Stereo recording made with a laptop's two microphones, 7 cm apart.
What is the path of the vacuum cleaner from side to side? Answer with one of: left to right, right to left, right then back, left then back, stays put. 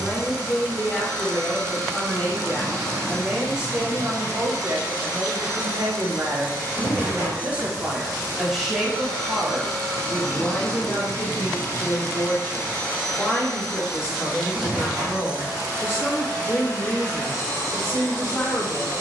left then back.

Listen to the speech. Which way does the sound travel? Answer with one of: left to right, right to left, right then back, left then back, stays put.
right then back.